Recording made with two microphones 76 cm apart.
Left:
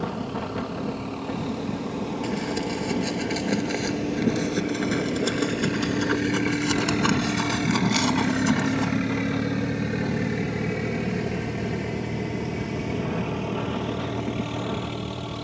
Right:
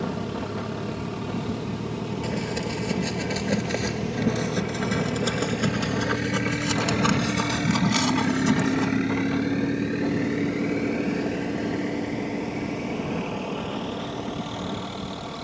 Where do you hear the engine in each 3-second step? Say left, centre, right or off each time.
right, right, centre, left, left.